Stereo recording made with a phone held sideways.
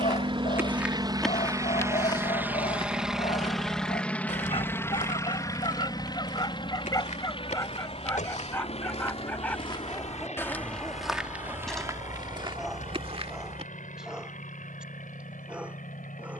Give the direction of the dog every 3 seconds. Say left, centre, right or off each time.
left, left, left, centre, centre, centre.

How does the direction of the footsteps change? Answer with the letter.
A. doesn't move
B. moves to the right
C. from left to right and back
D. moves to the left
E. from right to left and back
E.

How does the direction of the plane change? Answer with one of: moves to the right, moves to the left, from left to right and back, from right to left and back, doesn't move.
moves to the left.